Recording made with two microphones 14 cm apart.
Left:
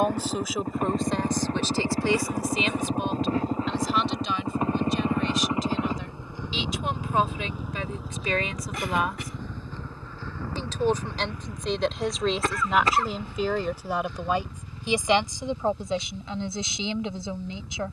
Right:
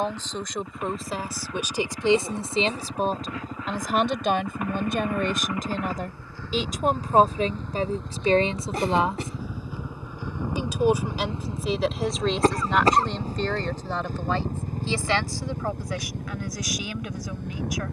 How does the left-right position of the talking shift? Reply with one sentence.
In this clip you hear the talking go right and come back.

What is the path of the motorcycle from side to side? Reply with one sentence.
In this clip you hear the motorcycle move from left to right.